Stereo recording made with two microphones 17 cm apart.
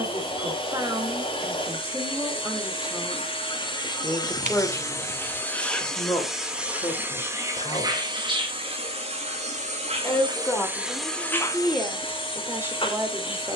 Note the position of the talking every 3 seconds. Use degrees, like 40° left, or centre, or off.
20° right, 10° left, 30° left, 10° left, 20° right.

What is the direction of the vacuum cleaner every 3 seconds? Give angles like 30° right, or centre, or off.
30° left, 20° left, 20° right, 10° right, 30° left.